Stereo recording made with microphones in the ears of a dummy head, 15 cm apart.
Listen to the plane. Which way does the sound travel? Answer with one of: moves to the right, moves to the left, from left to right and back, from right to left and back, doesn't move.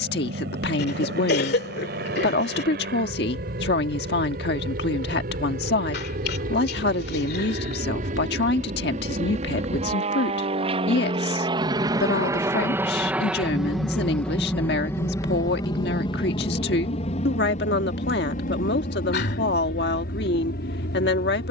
moves to the left.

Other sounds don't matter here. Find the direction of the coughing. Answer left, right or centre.
left.